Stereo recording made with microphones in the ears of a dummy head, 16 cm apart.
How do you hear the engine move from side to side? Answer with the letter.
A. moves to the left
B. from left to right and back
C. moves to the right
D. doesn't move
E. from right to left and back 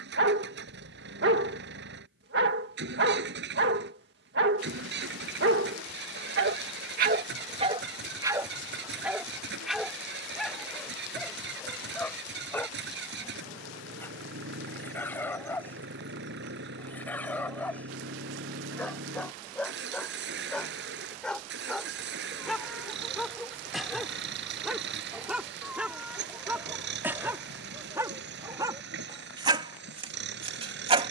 D.